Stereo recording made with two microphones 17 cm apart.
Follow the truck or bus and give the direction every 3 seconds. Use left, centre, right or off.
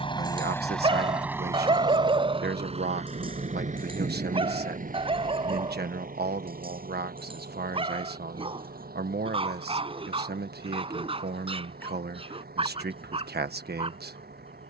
centre, right, right, right, right.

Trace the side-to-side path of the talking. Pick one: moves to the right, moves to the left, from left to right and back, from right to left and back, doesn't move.
doesn't move.